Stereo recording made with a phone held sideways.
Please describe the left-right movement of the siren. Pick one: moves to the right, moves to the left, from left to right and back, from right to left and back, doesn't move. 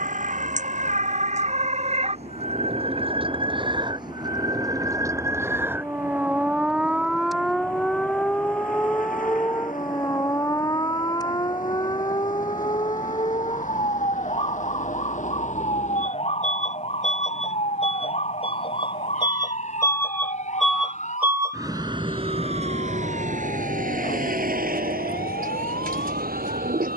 moves to the left.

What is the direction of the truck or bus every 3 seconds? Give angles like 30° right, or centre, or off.
70° left, 70° left, 70° left, 60° left, 60° left, 50° left, 20° left, 40° right, 70° right.